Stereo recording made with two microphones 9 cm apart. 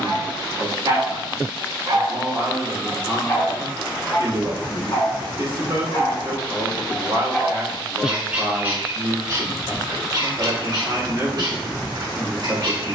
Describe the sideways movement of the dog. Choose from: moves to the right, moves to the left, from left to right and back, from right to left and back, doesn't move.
from right to left and back.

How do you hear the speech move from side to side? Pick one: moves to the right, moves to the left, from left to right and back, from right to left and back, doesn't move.
doesn't move.